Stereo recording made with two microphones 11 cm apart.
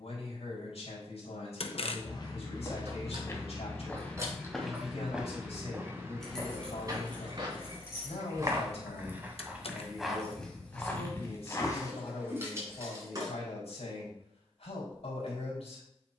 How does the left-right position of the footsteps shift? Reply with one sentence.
You can hear the footsteps move from left to right and back again.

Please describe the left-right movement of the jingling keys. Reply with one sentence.
In this clip you hear the jingling keys move from right to left and back again.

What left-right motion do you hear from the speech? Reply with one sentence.
In this clip you hear the speech stay in one place.